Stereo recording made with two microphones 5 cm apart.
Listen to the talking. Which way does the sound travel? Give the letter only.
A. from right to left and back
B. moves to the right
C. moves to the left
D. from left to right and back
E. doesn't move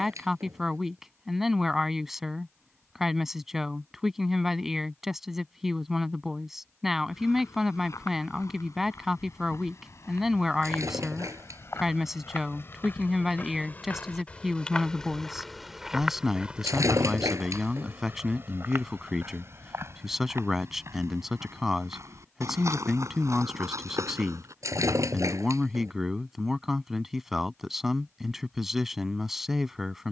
E.